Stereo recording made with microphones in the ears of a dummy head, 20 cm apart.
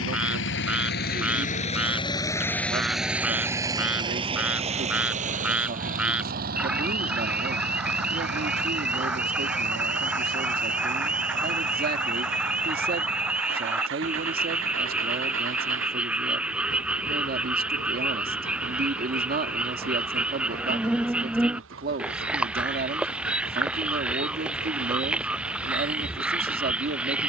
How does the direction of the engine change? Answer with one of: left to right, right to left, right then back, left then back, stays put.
left to right.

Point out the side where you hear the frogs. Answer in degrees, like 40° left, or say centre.
centre.